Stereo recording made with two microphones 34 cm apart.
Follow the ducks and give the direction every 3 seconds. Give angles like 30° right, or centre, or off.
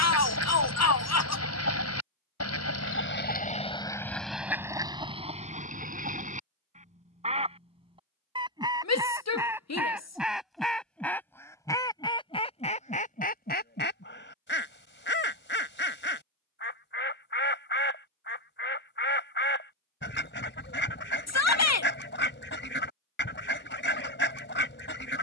50° left, centre, 20° right, centre, 30° left, 30° left, 30° left, 30° left, 30° left.